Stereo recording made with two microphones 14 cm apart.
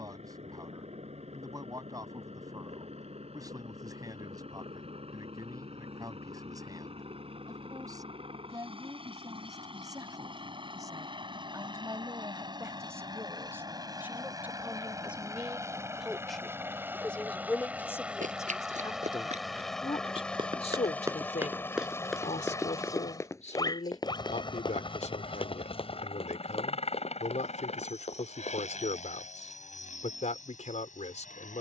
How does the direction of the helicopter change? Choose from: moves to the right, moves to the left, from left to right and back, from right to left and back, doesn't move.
moves to the left.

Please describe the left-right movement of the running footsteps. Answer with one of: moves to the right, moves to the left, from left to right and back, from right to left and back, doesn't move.
moves to the left.